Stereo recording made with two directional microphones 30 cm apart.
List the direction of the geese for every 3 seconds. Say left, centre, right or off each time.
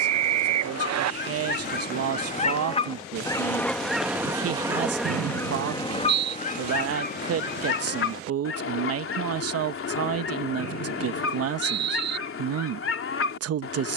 left, centre, left, left, left.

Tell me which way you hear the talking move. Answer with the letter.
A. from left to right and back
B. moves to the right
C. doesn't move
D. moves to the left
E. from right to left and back
C.